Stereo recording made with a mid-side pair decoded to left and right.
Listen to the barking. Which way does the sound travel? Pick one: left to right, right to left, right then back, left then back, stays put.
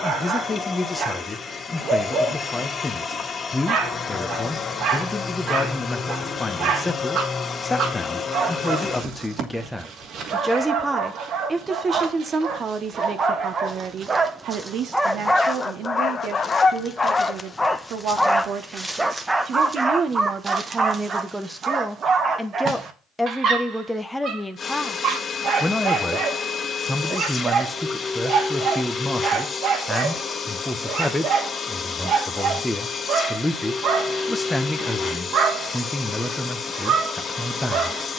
left then back.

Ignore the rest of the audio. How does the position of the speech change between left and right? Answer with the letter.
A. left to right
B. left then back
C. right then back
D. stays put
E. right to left
C.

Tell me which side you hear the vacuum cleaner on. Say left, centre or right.
left.